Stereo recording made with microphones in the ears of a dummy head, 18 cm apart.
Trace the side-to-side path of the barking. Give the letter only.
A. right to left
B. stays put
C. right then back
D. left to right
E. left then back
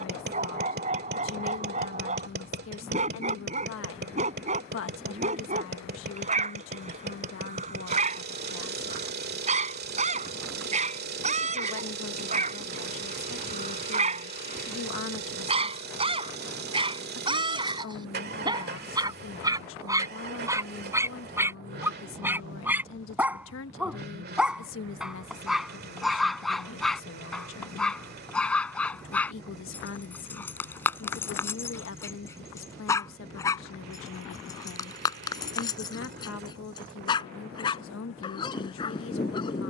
A.